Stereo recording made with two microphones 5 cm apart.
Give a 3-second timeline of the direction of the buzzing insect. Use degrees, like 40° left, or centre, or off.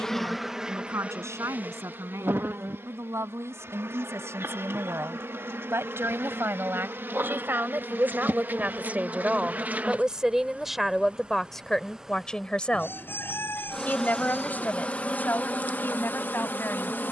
30° right, 60° right, 50° right, 30° right, 10° left, 40° left.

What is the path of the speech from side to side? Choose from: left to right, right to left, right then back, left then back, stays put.
right to left.